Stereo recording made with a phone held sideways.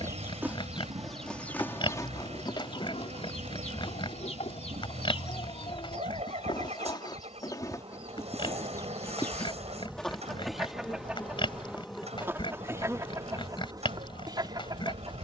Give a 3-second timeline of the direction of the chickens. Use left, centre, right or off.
centre, left, left, centre, right.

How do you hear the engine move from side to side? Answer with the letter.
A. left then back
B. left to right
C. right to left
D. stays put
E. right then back
D.